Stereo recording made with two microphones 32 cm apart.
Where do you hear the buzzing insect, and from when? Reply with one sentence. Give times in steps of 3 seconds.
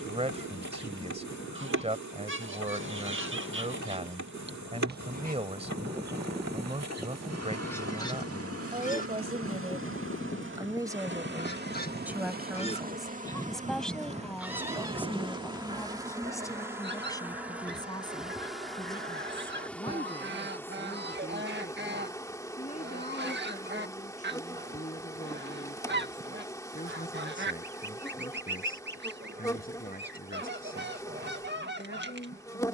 In this clip you hear the buzzing insect on the right from 0 s and in the centre from 15 s.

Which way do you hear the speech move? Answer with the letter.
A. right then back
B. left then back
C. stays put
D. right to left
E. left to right
D.